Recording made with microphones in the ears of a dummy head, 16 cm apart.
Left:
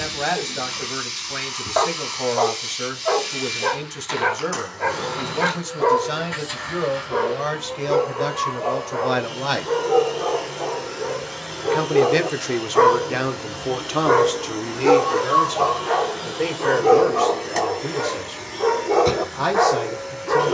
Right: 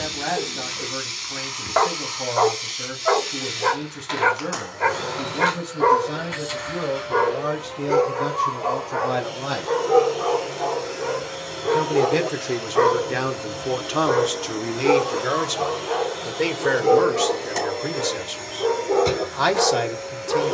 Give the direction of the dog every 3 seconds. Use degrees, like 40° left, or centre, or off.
30° right, 30° right, 30° right, 20° right, 20° left, 50° left, 50° left.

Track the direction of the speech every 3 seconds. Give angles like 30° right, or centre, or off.
70° left, 70° left, 70° left, 50° left, centre, 30° right, 50° right.